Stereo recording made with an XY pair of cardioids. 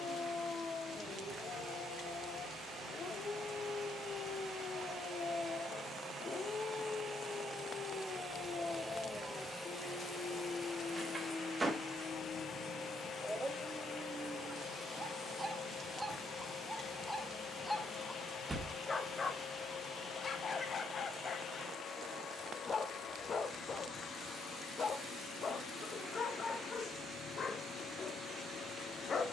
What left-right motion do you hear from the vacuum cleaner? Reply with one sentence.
You can hear the vacuum cleaner move from right to left.